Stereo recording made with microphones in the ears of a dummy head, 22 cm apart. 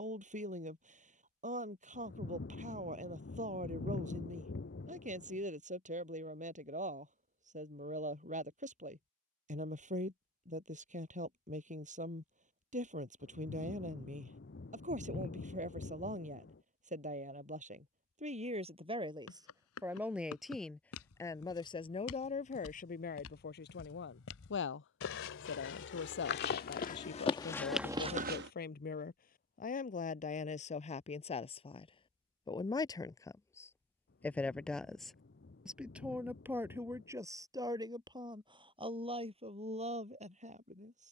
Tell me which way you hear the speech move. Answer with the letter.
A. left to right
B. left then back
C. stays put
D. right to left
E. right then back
B.